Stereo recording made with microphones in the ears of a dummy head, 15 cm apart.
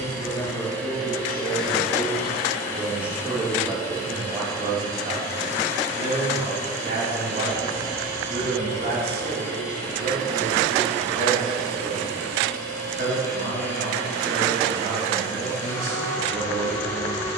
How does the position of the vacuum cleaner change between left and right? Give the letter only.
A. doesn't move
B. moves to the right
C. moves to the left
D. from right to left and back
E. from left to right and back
A.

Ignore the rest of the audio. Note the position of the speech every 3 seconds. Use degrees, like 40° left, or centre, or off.
10° left, 20° right, 50° right, 70° right, 70° right, 70° right.